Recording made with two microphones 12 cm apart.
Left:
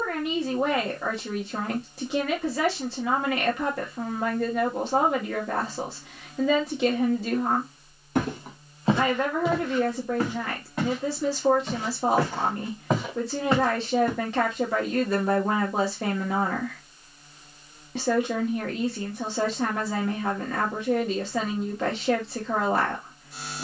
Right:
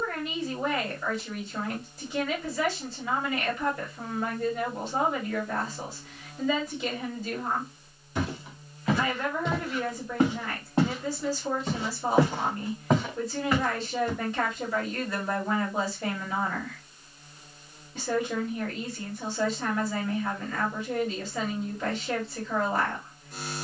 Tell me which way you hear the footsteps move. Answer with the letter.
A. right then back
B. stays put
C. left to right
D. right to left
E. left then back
A.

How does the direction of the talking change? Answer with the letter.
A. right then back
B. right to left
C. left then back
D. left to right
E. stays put
E.